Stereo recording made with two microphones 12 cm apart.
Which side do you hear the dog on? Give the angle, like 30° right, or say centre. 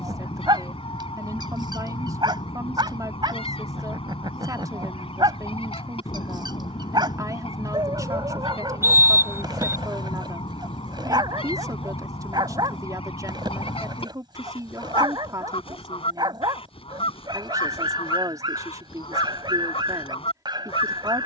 40° right.